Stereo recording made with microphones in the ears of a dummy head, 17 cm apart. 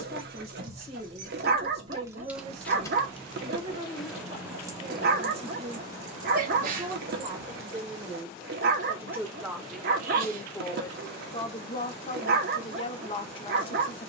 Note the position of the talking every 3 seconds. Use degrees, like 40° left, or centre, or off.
30° right, 30° right, 20° right, 10° left, 30° left.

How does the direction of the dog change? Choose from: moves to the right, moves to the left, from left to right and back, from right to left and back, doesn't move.
doesn't move.